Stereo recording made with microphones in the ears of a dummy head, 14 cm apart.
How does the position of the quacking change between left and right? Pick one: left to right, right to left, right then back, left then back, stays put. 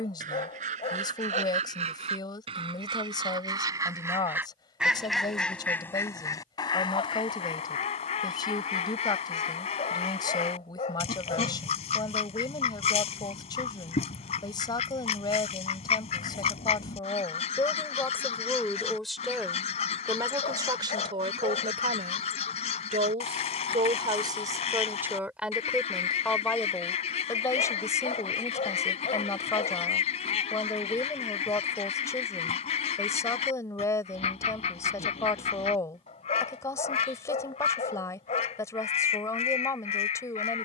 right to left.